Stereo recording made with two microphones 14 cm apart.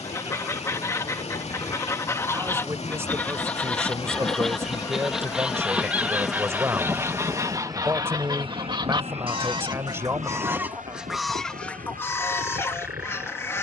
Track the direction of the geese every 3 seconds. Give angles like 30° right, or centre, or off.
20° left, centre, 20° right, 10° right, 20° left.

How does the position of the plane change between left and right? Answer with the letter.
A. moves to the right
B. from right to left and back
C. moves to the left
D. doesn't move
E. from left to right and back
A.